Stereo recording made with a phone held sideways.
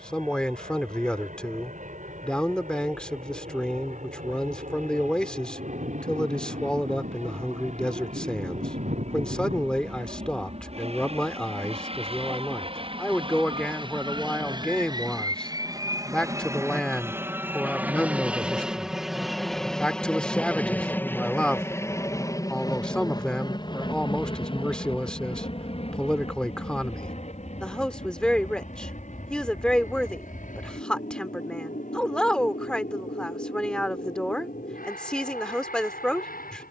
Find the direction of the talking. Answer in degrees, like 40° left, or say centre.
10° left.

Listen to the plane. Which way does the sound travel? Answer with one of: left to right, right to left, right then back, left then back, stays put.
right to left.